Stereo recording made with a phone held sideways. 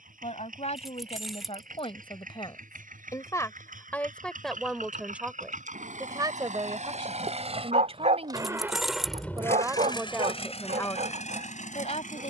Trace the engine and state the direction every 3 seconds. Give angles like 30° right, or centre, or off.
80° right, 70° right, 40° right, 40° left.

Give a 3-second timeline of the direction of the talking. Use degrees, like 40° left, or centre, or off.
50° left, centre, 40° right, 10° left.